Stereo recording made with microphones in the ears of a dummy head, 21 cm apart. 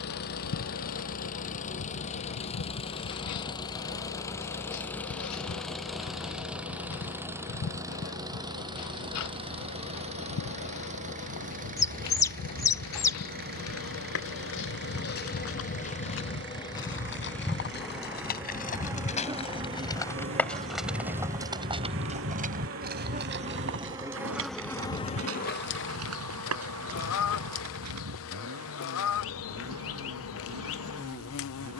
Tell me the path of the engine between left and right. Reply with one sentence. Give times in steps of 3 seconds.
In this clip you hear the engine on the left from 0 s, in the centre from 3 s and on the right from 9 s.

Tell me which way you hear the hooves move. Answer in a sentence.
In this clip you hear the hooves move to the right.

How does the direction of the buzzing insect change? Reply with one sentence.
You can hear the buzzing insect go right and come back.